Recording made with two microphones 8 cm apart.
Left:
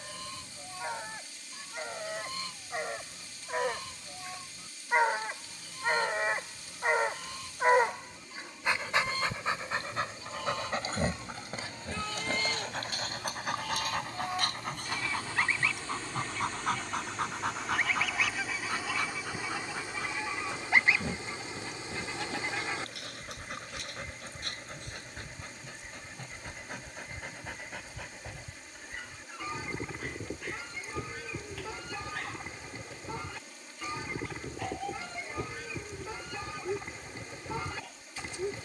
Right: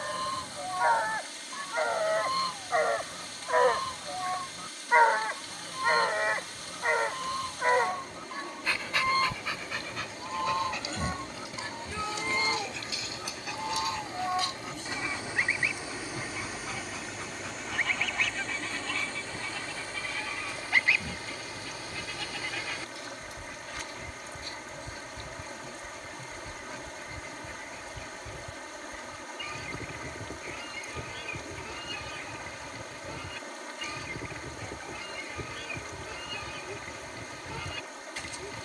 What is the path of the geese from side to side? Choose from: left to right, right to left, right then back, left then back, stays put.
right to left.